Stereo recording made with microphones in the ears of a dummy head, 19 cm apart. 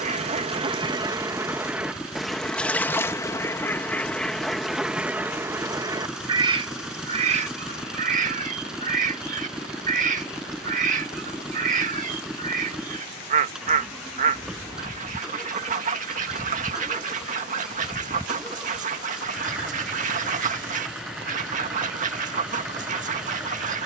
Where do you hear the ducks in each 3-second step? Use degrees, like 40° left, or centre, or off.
10° right, centre, 30° right, 40° right, 40° right, 40° right, 40° right, 40° right.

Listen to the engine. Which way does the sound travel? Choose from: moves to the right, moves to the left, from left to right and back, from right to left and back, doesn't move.
doesn't move.